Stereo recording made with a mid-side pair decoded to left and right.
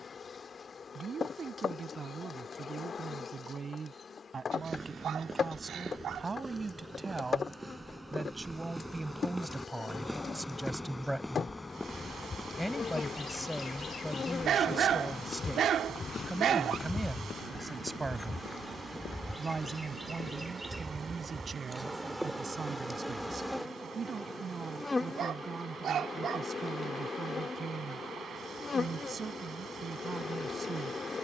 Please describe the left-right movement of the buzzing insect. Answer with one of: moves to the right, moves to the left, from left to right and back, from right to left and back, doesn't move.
from left to right and back.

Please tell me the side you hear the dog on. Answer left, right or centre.
right.